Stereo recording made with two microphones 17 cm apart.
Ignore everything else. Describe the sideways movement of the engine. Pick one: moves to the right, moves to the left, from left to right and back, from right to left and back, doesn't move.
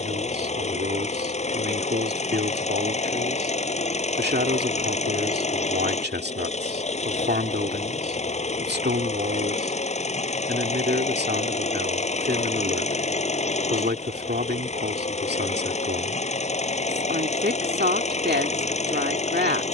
doesn't move.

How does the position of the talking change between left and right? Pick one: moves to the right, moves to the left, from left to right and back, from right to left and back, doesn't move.
doesn't move.